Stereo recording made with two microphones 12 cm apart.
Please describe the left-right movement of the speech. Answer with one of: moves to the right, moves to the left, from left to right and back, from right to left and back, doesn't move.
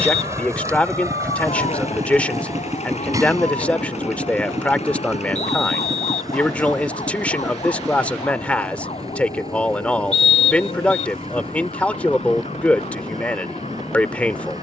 doesn't move.